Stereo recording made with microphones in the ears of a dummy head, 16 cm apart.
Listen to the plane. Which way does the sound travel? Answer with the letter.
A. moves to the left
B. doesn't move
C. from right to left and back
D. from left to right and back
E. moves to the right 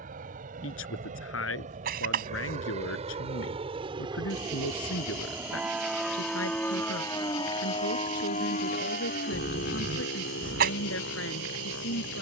A.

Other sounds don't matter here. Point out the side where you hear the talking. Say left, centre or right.
left.